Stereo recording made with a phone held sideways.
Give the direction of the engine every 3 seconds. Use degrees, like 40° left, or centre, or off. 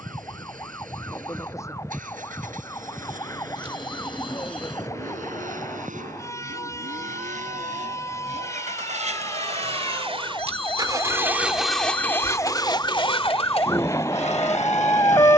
80° right, 80° right, 70° right, 30° right, 50° left.